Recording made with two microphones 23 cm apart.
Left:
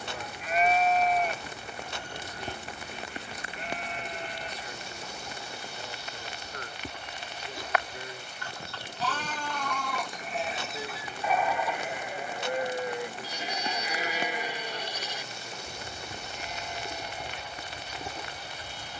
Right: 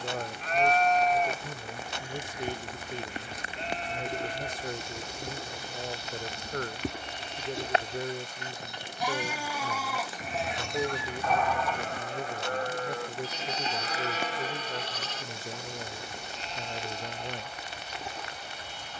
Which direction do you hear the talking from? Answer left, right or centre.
right.